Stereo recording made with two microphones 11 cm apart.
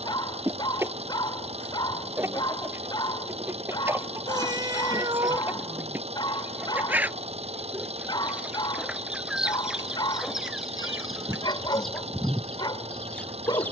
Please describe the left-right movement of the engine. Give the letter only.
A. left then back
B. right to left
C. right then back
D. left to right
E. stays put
E.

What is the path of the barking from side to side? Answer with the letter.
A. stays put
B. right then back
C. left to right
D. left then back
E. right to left
A.